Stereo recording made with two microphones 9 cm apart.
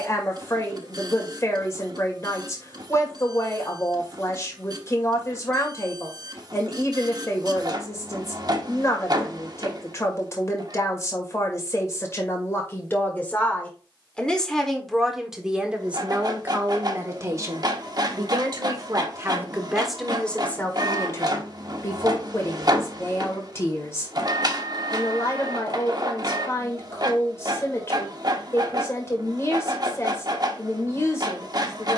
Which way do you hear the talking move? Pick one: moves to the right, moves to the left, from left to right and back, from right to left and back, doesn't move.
from left to right and back.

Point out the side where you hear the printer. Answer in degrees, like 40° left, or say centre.
50° right.